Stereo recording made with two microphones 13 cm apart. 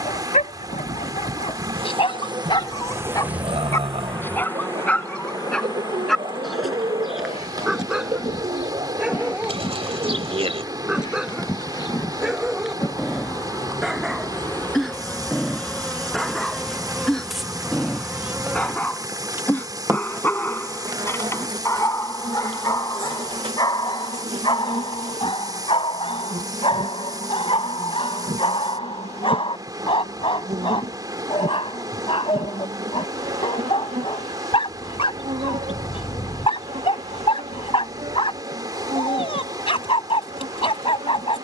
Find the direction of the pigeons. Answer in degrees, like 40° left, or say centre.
50° right.